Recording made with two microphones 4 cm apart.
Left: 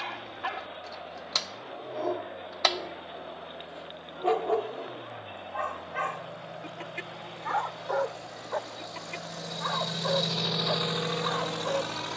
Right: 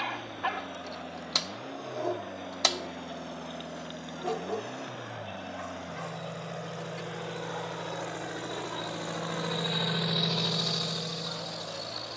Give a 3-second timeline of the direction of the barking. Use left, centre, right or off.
centre, left, left, left.